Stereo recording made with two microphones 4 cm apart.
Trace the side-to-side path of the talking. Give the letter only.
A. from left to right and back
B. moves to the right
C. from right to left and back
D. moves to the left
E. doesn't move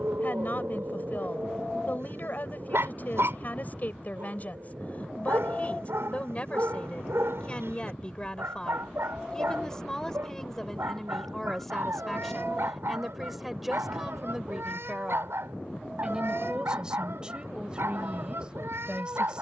B.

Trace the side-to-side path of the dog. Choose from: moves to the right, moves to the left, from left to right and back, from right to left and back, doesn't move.
doesn't move.